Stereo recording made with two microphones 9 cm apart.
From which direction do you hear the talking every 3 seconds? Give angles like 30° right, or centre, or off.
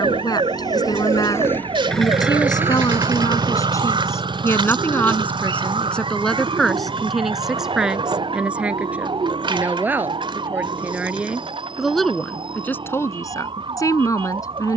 50° left, 30° left, centre, 20° right, 30° left.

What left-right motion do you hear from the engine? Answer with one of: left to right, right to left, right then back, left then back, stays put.
left to right.